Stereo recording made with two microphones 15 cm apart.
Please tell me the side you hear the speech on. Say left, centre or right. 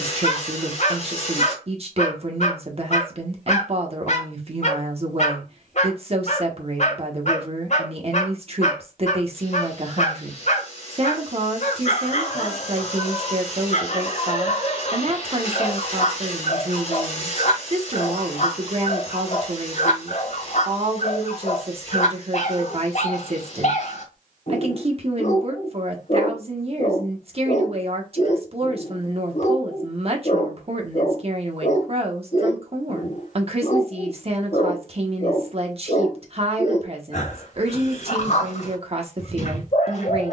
right.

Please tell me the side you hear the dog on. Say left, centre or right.
left.